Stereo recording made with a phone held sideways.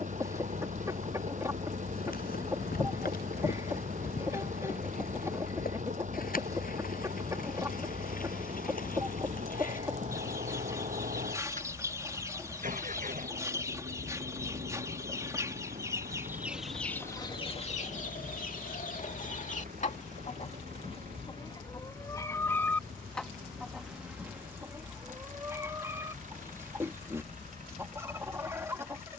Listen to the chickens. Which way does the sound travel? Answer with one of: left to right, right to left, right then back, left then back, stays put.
left then back.